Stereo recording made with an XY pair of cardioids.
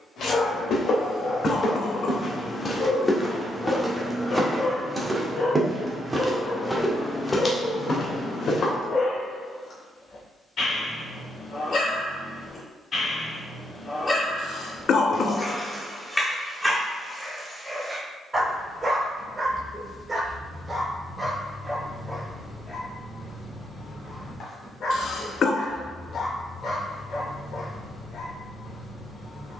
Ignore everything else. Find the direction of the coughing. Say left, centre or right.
left.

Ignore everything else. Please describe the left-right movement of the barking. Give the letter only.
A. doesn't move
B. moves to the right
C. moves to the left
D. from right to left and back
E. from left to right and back
E.